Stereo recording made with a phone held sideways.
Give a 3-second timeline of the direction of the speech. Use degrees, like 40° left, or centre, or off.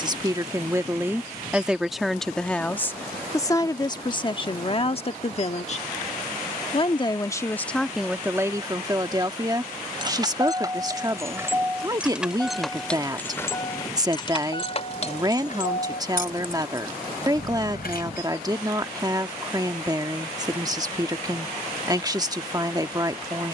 10° right, 30° left, centre, 20° right, 20° right, 20° right, 20° right, 20° right.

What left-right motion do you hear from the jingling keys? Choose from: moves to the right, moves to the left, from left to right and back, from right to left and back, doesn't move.
moves to the left.